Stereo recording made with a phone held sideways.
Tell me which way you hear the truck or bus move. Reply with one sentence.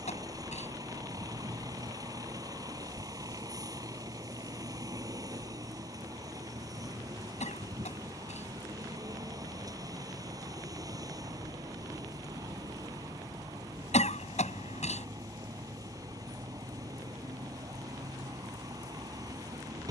You can hear the truck or bus stay put.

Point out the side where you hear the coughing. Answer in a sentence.
In this clip you hear the coughing on the left.